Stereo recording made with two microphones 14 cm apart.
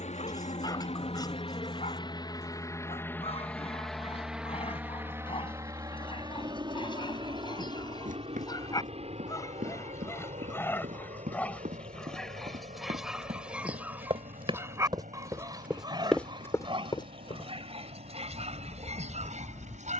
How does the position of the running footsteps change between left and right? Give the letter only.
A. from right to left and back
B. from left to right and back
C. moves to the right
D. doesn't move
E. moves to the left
E.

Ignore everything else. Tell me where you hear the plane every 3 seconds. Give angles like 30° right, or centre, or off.
40° left, 10° right, 30° right, 50° right, 50° right, 60° right, 60° right.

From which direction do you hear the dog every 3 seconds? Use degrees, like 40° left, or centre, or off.
50° left, 40° left, 30° left, 20° left, 10° right, 40° right, 50° right.